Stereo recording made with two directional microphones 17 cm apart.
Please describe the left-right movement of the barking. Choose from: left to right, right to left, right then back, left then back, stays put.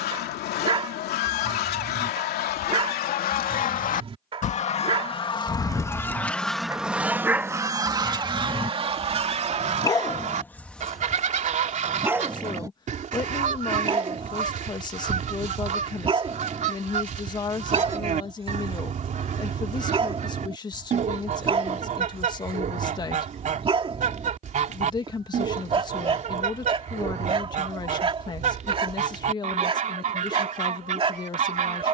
left then back.